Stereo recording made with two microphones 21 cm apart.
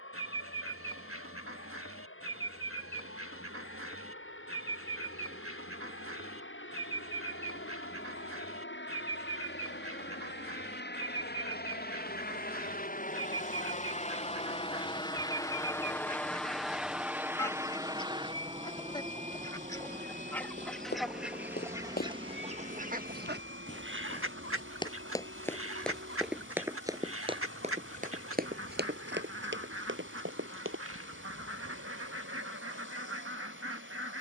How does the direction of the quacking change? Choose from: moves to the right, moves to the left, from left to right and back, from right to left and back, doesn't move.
from right to left and back.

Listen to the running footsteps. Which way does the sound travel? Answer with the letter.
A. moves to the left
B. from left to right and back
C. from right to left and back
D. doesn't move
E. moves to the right
E.